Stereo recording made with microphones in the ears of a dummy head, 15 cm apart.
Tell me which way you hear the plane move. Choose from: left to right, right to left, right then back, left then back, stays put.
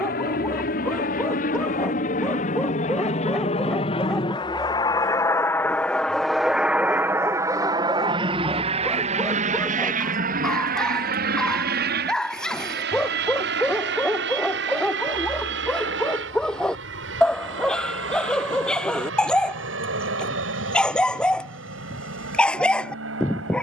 left to right.